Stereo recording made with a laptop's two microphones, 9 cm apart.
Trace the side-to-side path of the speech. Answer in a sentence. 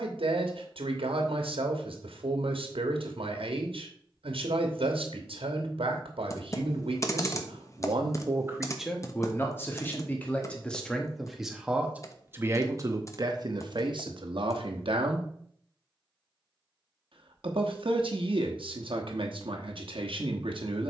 In this clip you hear the speech move from right to left and back again.